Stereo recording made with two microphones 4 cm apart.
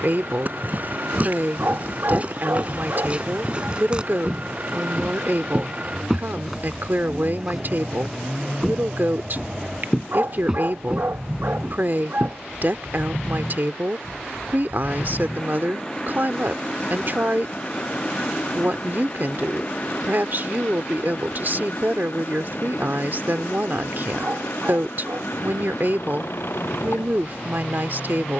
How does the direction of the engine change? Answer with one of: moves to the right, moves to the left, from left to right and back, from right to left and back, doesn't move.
moves to the left.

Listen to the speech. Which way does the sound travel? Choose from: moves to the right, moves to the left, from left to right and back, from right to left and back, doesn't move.
doesn't move.